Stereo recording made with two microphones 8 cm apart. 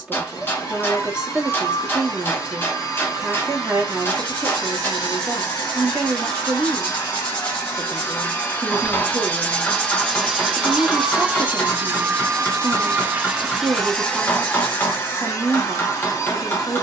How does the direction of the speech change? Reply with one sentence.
You can hear the speech stay put.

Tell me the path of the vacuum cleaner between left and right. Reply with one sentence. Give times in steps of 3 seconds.
In this clip you hear the vacuum cleaner on the left from 0 s, in the centre from 9 s and on the left from 15 s.